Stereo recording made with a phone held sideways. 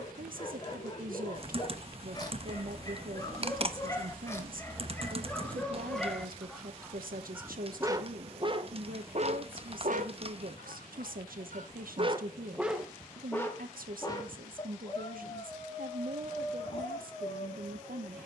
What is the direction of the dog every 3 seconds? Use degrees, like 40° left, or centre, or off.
30° left, 20° left, 20° right, 60° right, 10° left, 30° left.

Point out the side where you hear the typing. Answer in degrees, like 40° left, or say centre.
40° right.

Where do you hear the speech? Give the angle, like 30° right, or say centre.
80° right.